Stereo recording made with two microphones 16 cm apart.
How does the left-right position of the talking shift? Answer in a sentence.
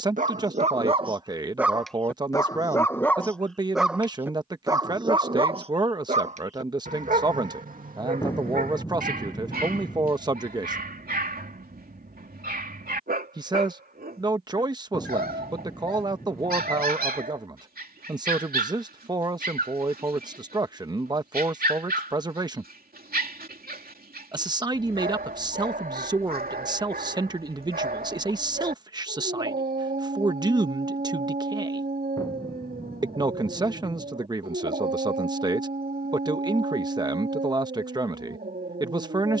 You can hear the talking stay put.